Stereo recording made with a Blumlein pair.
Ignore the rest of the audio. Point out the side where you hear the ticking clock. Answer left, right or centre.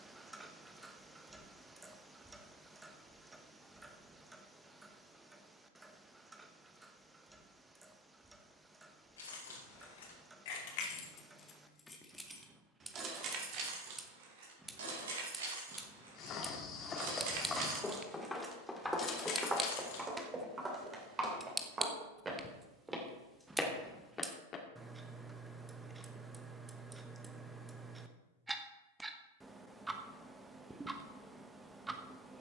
centre.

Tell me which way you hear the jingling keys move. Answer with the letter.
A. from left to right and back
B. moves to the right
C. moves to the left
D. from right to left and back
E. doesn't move
A.